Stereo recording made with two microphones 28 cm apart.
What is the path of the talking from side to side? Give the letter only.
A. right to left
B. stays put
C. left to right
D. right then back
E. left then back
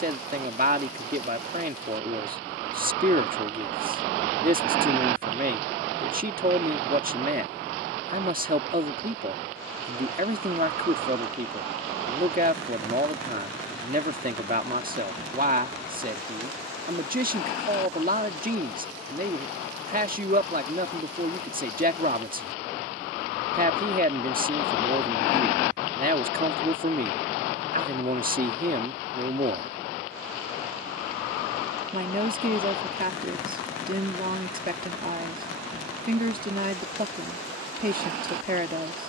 B.